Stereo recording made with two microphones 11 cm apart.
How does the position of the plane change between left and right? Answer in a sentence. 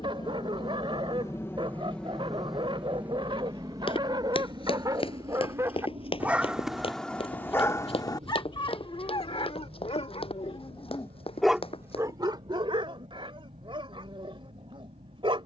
In this clip you hear the plane move to the right.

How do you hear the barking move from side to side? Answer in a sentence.
In this clip you hear the barking move from right to left and back again.